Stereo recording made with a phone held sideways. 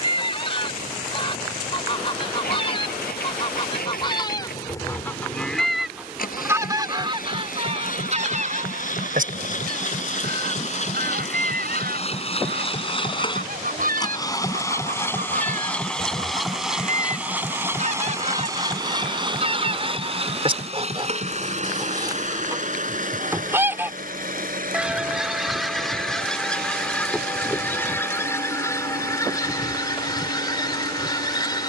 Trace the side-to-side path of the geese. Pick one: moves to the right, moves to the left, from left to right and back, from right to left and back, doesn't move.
from left to right and back.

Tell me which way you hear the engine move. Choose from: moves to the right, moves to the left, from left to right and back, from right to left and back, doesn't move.
moves to the right.